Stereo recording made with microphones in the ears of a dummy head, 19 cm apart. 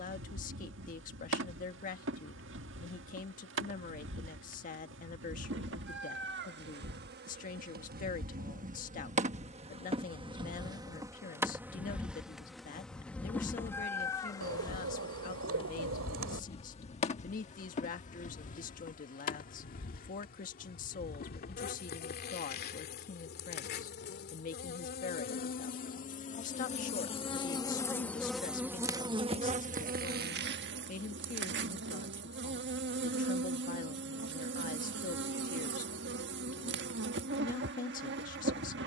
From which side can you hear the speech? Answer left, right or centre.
left.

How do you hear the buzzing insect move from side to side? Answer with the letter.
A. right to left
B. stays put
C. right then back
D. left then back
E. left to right
D.